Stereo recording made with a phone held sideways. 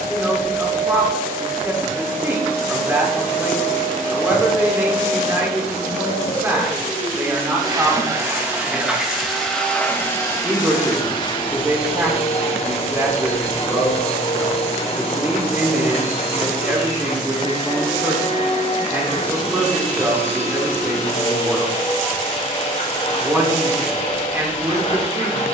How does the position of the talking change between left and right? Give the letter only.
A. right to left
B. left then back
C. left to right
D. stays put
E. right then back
D.